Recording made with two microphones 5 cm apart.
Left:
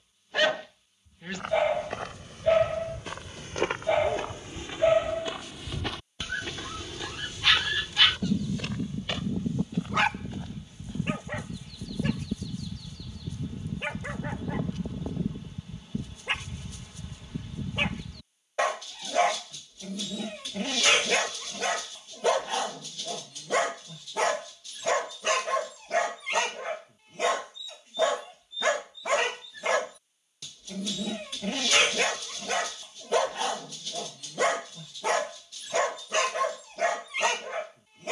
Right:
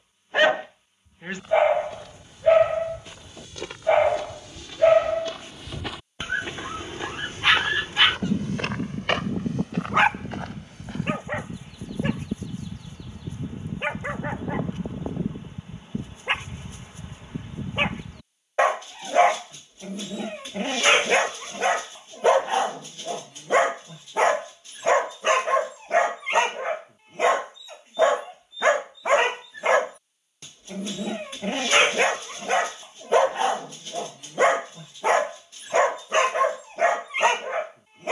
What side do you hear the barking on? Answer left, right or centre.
right.